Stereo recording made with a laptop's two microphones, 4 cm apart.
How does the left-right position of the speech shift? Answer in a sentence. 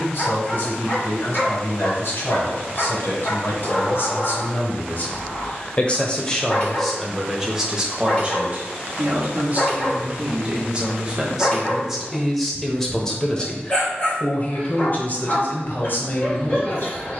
You can hear the speech go right and come back.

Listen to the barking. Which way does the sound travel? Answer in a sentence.
You can hear the barking stay put.